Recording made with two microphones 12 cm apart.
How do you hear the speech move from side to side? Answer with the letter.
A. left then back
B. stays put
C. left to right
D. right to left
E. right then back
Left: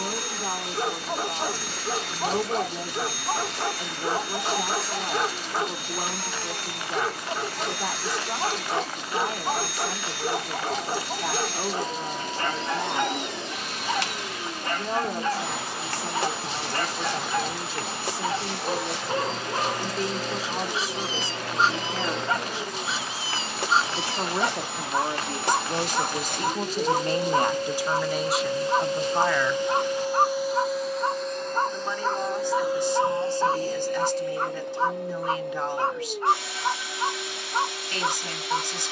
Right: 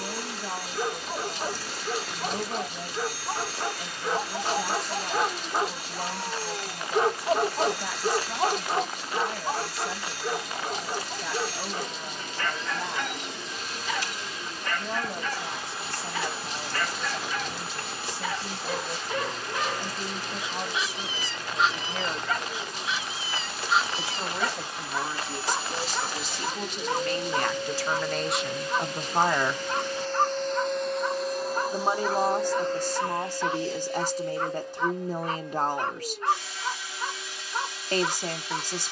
C.